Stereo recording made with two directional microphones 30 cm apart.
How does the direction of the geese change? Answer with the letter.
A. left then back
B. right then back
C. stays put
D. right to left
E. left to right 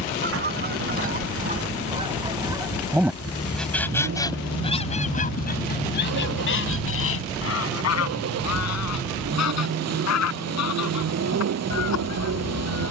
D.